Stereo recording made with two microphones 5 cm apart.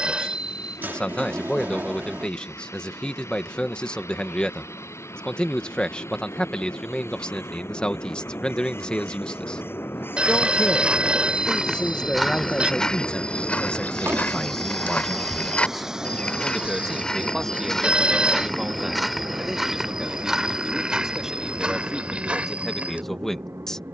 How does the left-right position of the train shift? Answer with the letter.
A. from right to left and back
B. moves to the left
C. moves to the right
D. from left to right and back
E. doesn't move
C.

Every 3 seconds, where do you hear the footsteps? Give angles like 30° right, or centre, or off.
off, off, off, 20° right, 20° left, 20° left, 10° right, 20° right.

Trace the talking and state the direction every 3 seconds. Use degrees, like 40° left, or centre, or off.
20° left, 20° left, 20° left, 20° left, 20° left, centre, 10° right, centre.